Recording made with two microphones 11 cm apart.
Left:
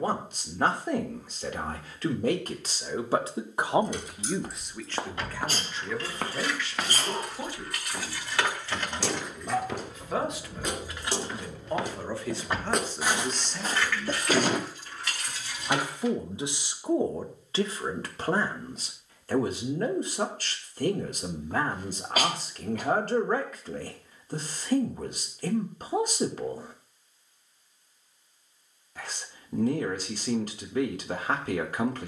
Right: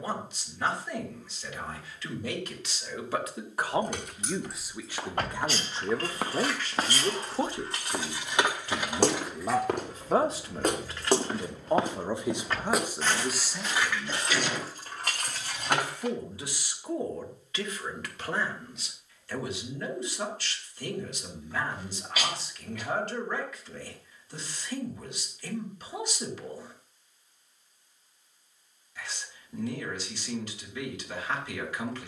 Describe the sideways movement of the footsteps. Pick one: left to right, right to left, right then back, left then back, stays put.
right then back.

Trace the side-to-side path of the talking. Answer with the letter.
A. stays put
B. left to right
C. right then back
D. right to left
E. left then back
C.